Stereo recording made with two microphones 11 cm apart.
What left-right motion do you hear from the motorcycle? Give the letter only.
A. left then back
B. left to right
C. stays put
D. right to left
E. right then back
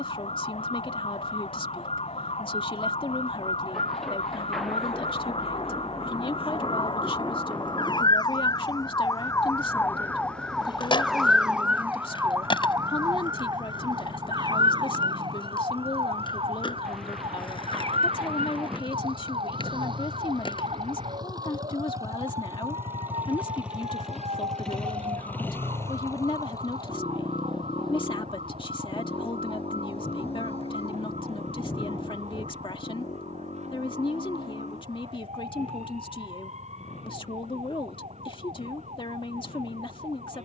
D.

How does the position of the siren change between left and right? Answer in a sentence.
In this clip you hear the siren move from left to right.